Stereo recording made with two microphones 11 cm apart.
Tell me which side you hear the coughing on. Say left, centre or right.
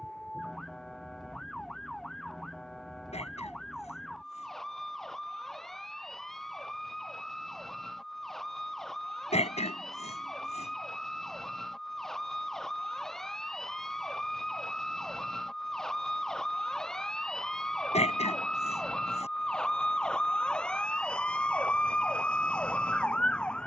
left.